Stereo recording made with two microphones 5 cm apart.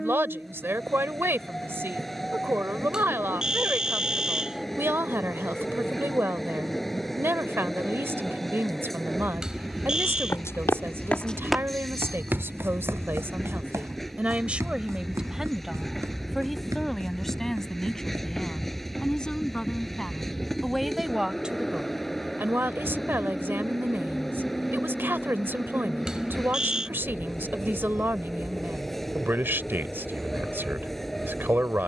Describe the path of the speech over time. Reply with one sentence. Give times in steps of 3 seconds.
In this clip you hear the speech on the right from 0 s, in the centre from 15 s and on the right from 21 s.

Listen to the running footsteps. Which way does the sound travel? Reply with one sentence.
In this clip you hear the running footsteps move from left to right.